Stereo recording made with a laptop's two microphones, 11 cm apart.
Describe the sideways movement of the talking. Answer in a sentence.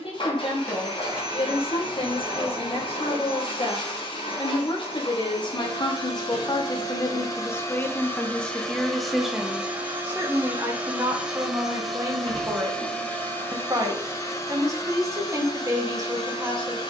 In this clip you hear the talking move to the right.